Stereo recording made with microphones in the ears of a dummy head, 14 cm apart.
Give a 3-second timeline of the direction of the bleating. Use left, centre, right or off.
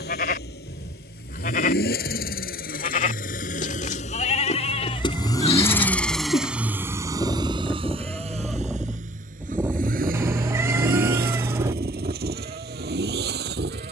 left, left, centre, right, right.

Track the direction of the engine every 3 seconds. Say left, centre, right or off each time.
left, left, right, right, right.